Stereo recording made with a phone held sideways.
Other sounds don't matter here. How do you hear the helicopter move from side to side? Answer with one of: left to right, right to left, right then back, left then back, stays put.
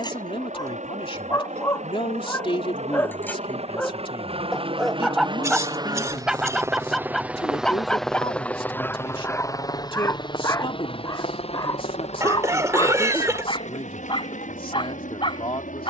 right to left.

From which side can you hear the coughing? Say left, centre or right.
right.